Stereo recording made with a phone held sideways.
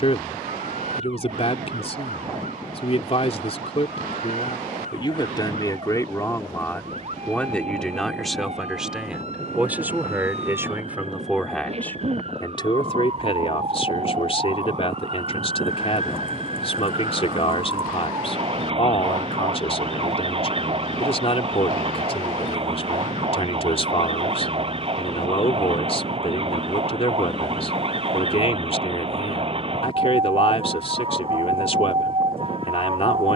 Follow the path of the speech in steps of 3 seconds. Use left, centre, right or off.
left, left, centre, centre, left, left, left, left, left, left, left.